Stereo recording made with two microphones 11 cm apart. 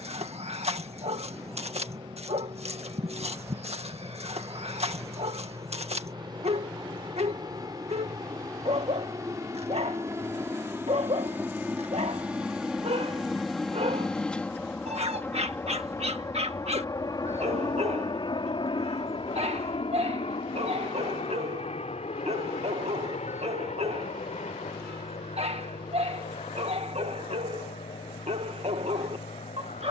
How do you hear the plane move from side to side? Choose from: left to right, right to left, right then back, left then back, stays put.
right to left.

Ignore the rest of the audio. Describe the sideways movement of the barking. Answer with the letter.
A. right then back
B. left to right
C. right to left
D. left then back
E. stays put
E.